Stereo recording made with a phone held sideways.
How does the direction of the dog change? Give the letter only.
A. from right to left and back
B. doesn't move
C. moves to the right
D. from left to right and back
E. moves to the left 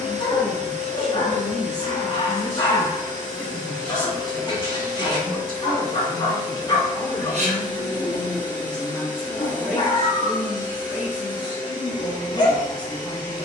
B.